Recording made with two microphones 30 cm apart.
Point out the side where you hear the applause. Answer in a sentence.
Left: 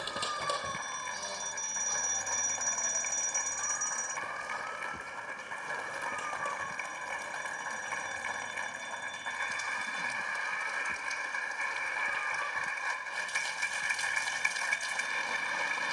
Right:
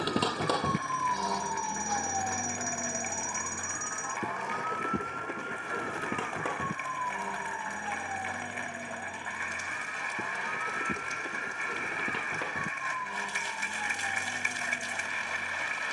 You can hear the applause on the left.